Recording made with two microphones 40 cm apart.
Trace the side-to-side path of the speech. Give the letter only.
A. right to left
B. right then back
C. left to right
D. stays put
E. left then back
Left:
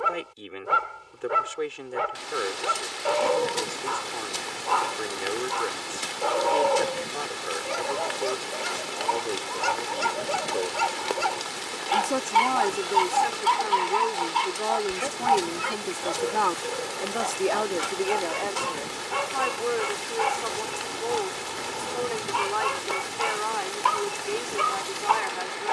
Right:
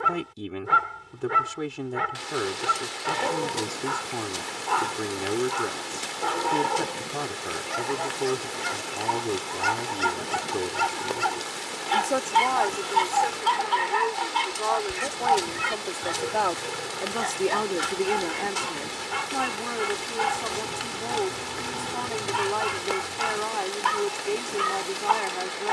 E.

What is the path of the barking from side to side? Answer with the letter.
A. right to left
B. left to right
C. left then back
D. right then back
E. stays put
E.